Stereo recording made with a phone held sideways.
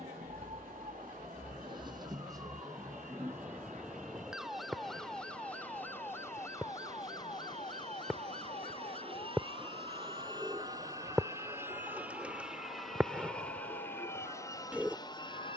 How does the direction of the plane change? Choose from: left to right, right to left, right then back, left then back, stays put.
right to left.